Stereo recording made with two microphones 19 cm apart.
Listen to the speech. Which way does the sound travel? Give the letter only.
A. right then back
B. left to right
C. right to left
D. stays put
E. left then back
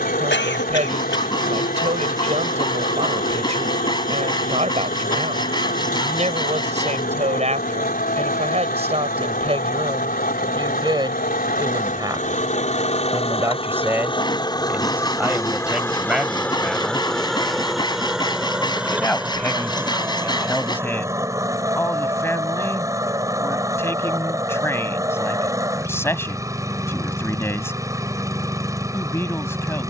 C.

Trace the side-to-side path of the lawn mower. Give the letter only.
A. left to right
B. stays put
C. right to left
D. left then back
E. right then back
A.